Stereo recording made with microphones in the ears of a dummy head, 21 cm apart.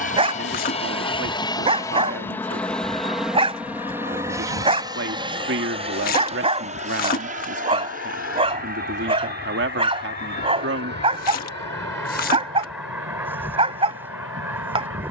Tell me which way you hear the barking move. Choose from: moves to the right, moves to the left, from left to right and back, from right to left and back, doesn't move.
doesn't move.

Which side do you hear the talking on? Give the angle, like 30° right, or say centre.
50° right.